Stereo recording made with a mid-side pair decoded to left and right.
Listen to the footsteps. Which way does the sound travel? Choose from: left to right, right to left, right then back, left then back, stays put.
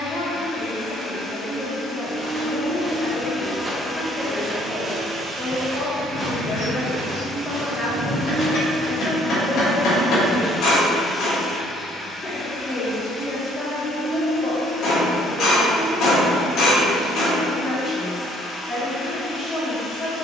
right to left.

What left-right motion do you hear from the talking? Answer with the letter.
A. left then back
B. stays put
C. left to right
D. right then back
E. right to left
B.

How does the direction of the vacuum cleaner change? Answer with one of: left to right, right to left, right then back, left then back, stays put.
right then back.